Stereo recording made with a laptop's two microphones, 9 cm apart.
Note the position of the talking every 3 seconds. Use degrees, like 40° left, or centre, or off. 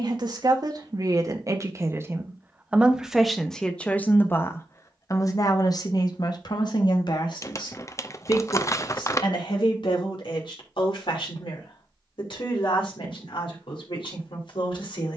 40° right, 30° left, 60° left, 70° left, 80° left.